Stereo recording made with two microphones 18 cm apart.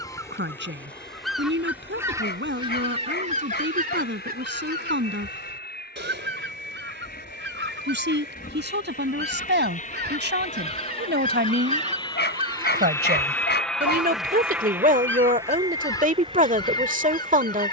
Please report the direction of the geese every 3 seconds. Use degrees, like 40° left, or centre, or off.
centre, 50° right, 70° right, 50° right, 10° right, 20° left.